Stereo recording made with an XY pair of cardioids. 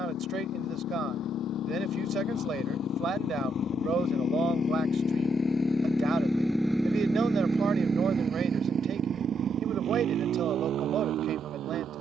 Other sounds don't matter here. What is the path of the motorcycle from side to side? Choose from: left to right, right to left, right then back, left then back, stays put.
left to right.